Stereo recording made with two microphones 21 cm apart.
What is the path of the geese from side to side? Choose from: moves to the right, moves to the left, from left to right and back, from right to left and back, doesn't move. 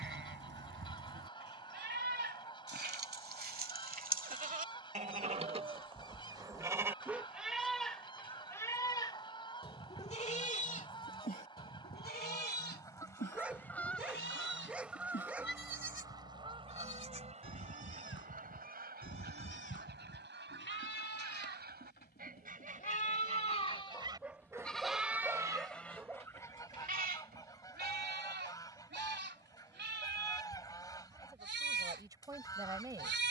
from left to right and back.